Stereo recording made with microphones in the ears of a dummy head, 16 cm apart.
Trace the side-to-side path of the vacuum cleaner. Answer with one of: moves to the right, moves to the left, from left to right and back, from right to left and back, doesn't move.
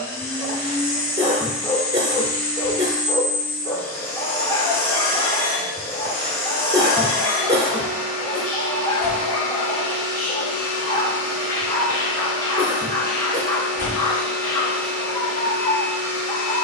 doesn't move.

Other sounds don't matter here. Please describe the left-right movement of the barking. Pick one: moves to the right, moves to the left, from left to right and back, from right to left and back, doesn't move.
doesn't move.